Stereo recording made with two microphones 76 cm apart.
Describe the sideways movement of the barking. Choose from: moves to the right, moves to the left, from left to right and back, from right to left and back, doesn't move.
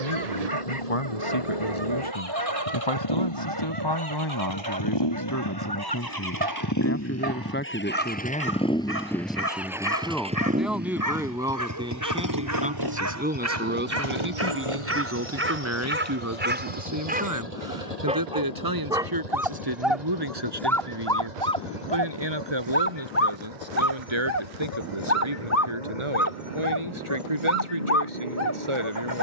moves to the left.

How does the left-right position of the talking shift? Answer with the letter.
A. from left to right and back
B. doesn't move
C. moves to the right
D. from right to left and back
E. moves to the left
C.